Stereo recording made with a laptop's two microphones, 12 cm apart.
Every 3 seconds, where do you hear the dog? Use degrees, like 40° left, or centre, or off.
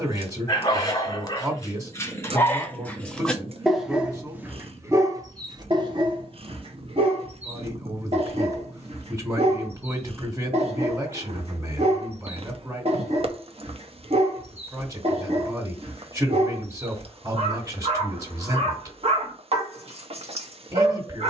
30° left, 20° right, 60° right, 60° right, 60° right, 60° right, 60° right.